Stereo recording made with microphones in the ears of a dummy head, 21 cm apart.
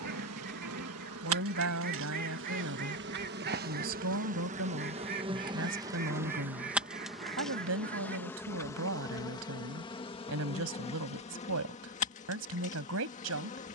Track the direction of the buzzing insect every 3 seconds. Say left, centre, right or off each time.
right, right, centre, left, left.